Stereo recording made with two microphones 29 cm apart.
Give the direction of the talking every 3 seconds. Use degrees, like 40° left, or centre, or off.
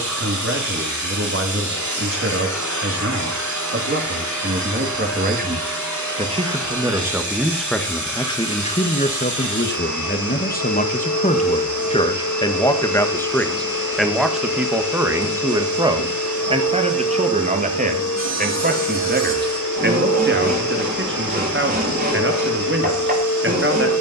50° right, 40° right, centre, 30° left, 10° left, 20° right, 30° right, 40° right.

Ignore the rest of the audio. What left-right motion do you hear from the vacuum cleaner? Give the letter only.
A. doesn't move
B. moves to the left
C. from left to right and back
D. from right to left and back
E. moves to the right
A.